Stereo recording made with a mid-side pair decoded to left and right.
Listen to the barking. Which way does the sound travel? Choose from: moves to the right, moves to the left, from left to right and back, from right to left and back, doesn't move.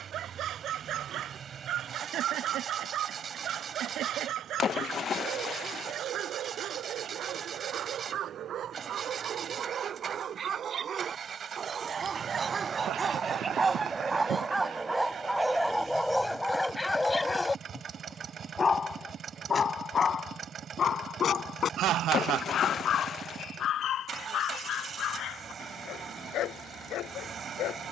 moves to the left.